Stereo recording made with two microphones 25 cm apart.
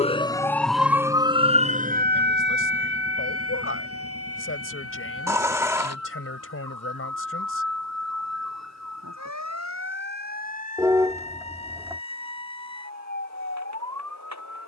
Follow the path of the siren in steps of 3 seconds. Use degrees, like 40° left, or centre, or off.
20° right, 60° right, 70° right, 70° right, 70° right.